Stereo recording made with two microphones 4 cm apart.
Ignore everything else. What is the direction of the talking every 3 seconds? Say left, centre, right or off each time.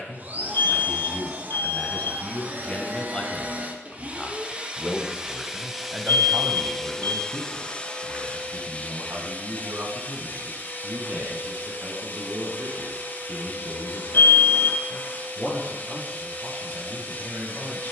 left, centre, right, right, right, right.